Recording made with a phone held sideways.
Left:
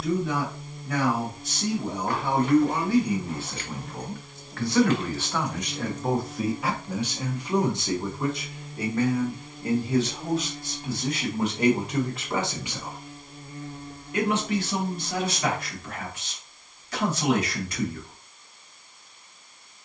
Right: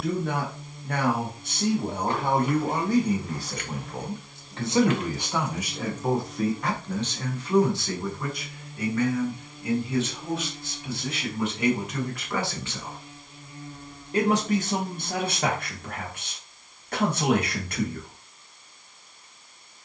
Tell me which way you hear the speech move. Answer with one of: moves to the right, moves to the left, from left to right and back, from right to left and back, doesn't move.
from right to left and back.